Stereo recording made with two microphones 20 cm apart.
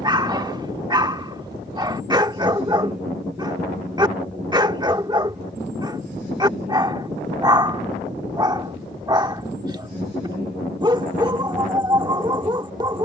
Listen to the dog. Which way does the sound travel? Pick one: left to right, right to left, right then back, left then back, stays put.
stays put.